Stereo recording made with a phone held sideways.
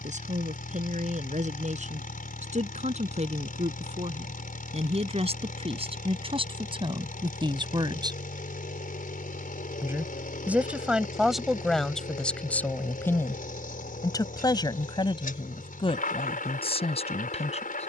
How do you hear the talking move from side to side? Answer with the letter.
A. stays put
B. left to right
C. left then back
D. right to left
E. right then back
D.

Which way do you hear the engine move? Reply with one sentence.
In this clip you hear the engine stay in one place.